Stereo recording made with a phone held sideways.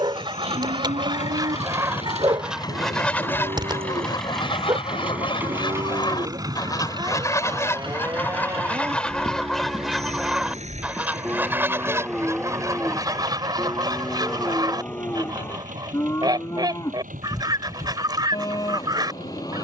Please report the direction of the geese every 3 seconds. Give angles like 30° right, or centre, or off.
20° right, 30° left, 20° left, 10° right, 20° right, 30° right, 30° right.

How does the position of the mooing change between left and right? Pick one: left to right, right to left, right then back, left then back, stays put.
right to left.